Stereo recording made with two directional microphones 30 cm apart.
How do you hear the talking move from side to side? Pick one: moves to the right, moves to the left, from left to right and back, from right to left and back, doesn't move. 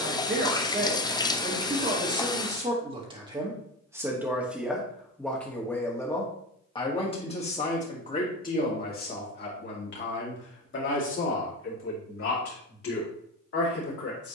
moves to the left.